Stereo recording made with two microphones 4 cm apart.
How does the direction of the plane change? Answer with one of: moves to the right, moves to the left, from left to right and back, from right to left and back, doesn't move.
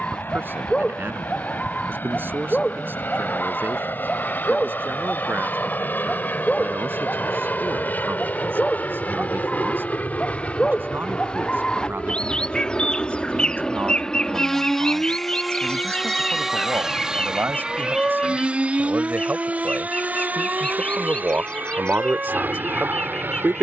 moves to the right.